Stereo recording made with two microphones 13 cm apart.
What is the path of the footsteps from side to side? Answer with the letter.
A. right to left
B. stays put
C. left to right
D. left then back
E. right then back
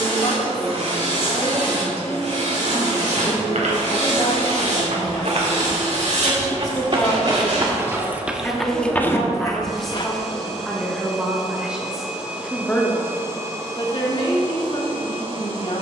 A.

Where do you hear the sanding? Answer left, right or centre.
right.